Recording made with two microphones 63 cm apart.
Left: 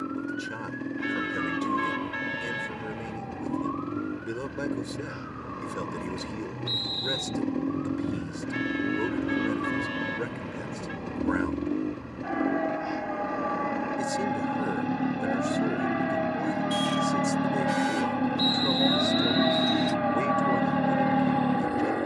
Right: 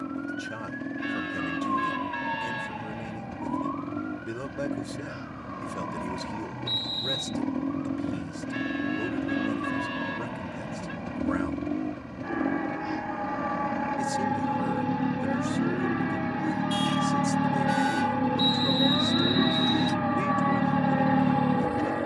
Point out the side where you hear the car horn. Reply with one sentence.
In this clip you hear the car horn on the left.